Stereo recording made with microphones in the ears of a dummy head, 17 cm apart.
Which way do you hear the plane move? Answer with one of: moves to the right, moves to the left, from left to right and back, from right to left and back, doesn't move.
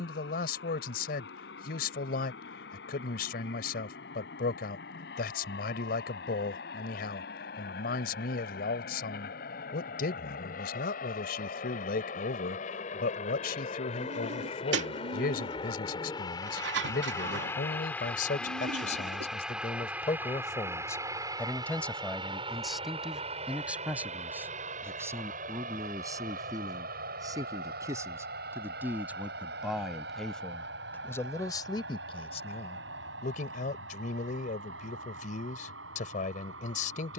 moves to the right.